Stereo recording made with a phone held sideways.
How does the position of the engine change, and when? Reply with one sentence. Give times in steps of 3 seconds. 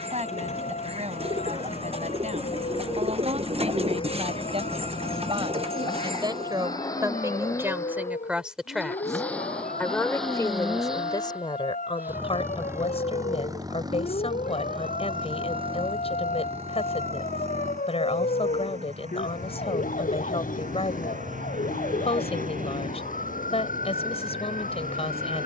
In this clip you hear the engine on the left from 0 s, in the centre from 9 s and on the right from 12 s.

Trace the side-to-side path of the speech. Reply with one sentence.
You can hear the speech move to the left.